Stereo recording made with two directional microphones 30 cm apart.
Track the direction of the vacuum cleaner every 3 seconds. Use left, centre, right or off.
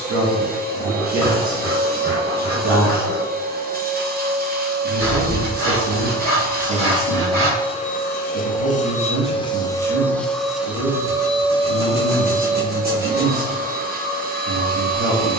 right, right, centre, centre, right.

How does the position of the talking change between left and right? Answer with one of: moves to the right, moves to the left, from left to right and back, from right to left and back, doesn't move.
doesn't move.